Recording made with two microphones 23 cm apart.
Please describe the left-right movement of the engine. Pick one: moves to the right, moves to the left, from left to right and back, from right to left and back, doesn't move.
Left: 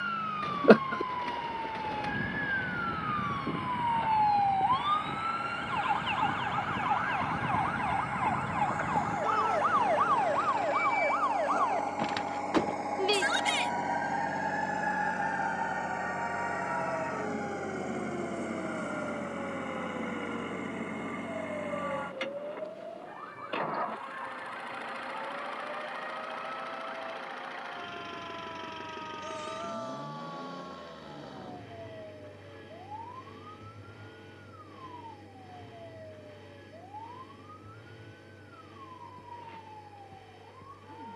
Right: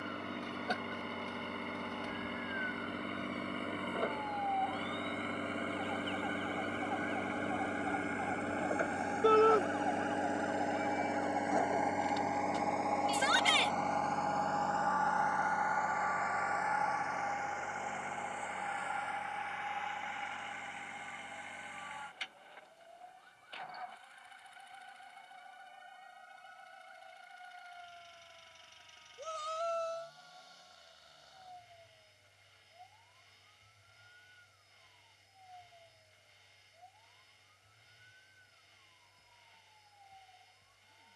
moves to the left.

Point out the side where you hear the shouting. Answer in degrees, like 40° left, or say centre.
60° right.